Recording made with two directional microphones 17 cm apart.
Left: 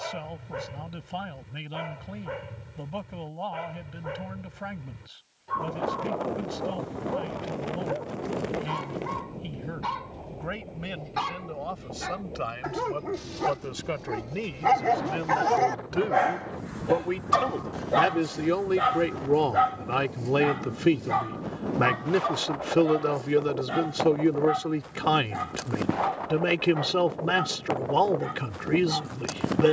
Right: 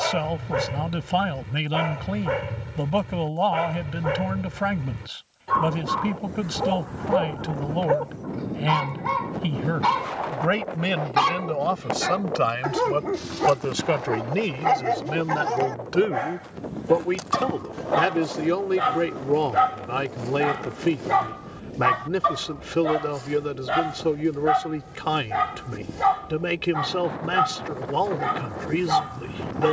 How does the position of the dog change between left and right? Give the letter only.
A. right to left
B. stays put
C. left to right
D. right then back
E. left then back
E.